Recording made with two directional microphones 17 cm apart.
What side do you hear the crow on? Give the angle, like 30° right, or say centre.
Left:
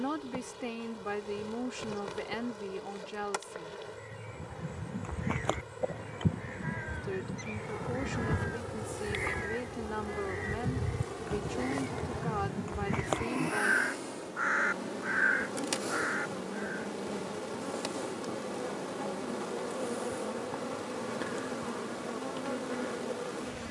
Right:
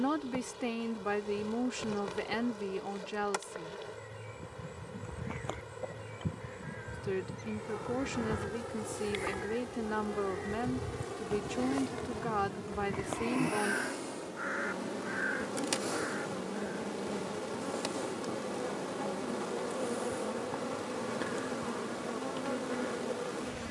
50° left.